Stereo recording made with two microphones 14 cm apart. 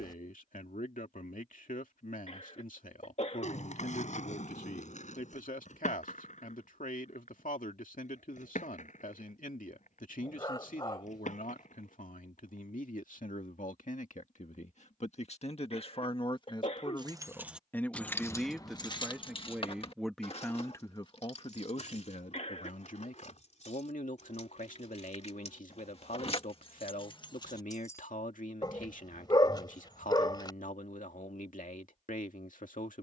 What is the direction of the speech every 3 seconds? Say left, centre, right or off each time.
left, left, left, left, left, left, centre, left, left, left, left.